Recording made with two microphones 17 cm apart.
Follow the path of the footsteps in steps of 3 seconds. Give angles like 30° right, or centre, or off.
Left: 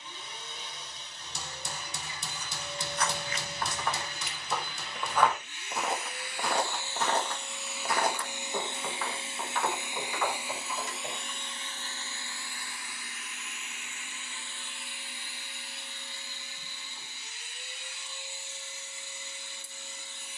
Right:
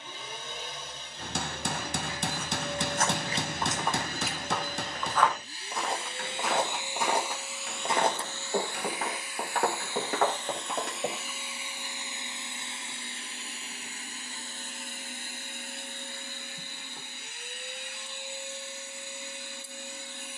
60° right, 10° right, 20° right, 60° right, off, off, off.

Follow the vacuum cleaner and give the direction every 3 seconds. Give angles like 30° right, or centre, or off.
60° right, 40° right, centre, 10° left, 30° right, 50° right, 60° right.